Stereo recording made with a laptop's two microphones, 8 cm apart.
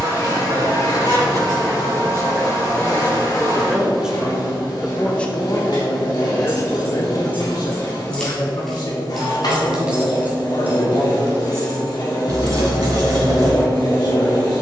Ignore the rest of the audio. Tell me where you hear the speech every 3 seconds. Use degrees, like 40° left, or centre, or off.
40° right, centre, 50° left, 70° left, 70° left.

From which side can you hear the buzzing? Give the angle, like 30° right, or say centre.
50° left.